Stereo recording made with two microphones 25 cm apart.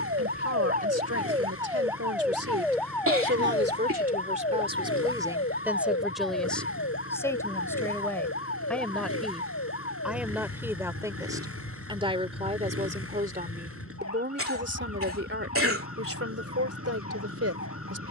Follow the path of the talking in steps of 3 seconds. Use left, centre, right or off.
right, right, centre, centre, right, right.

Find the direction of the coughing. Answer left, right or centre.
right.